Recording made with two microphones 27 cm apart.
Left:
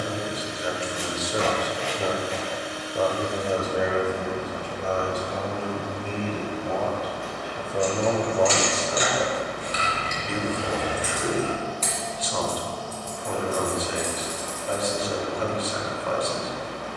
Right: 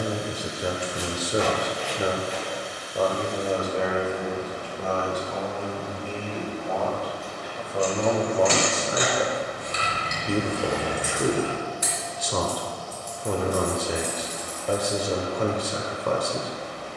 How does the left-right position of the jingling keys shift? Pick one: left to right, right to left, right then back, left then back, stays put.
right to left.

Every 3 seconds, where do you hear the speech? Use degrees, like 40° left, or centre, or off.
30° right, 20° left, 10° left, 40° right, 50° right, 50° right.